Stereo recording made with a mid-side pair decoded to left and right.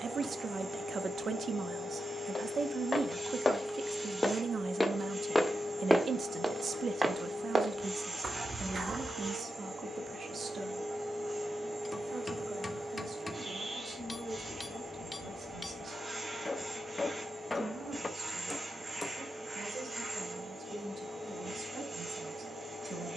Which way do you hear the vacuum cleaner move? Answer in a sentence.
You can hear the vacuum cleaner stay in one place.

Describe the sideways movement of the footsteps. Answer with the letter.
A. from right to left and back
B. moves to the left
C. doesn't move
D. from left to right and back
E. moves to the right
E.